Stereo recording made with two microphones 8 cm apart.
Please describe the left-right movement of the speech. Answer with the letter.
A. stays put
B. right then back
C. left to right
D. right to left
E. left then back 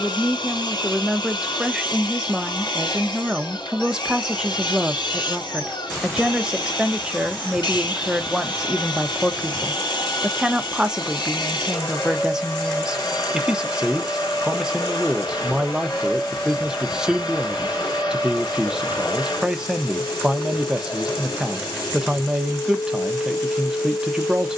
A.